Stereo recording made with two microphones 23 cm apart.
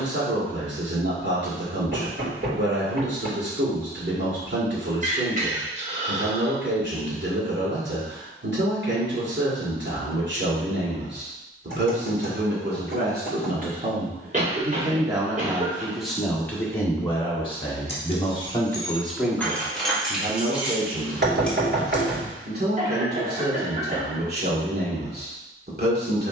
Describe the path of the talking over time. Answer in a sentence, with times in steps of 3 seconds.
You can hear the talking on the right from 0 s, in the centre from 15 s and on the right from 21 s.